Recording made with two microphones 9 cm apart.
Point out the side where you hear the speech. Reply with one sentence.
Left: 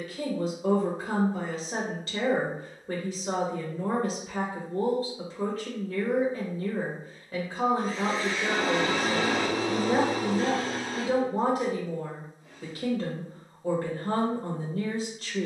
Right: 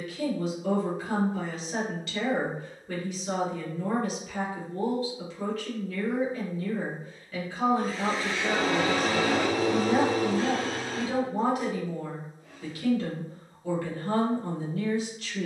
In this clip you hear the speech on the left.